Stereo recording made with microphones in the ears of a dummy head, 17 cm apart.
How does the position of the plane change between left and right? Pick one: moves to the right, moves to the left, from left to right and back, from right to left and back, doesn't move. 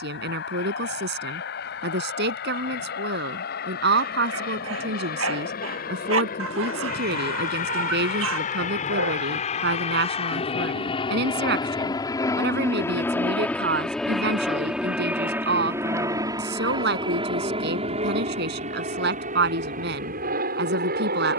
moves to the right.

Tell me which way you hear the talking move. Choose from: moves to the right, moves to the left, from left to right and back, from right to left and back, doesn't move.
doesn't move.